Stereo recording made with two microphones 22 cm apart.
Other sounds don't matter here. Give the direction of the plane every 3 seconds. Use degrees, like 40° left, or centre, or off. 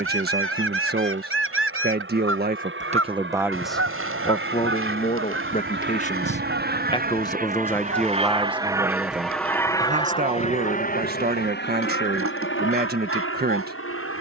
80° right, 70° right, 40° right, 30° left, 60° left.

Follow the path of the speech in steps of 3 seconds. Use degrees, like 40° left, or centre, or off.
50° right, 20° left, 10° left, 40° right, 50° right.